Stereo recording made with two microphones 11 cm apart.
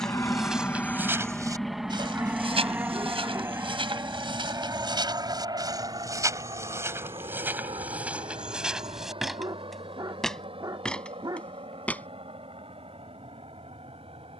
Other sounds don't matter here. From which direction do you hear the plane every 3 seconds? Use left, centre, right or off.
centre, right, right, right, right.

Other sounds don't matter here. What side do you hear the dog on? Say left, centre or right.
right.